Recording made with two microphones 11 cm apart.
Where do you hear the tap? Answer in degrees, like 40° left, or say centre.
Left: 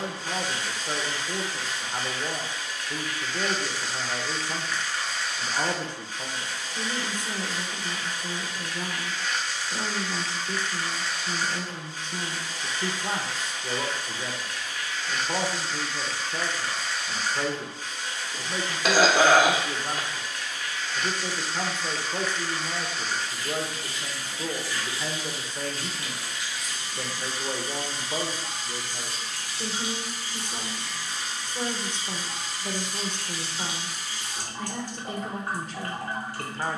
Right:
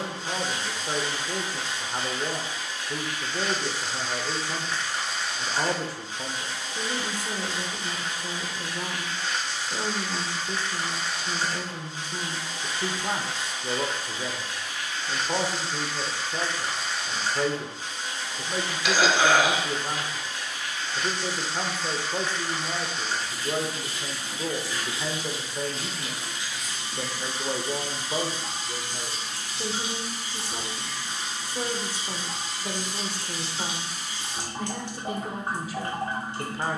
20° right.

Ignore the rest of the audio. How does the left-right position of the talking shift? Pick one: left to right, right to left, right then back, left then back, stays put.
stays put.